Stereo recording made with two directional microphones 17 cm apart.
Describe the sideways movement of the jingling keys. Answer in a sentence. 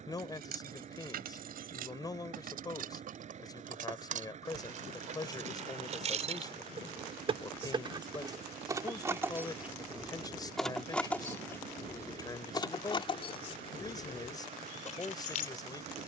You can hear the jingling keys travel towards the left.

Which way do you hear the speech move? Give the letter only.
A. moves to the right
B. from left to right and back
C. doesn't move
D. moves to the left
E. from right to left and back
C.